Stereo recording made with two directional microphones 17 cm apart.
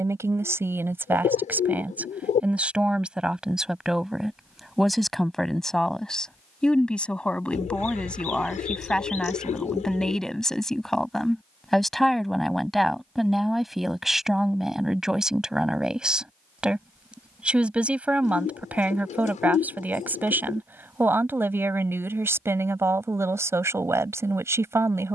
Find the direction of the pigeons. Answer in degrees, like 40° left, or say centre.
50° left.